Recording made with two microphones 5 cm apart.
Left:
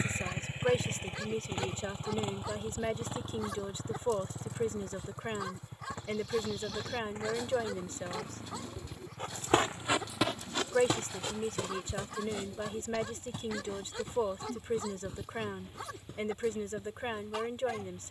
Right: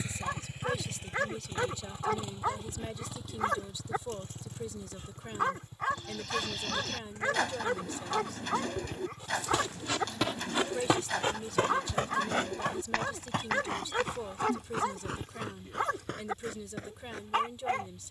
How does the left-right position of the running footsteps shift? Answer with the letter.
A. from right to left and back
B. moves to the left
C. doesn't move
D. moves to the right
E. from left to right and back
D.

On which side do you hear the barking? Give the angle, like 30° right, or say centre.
50° right.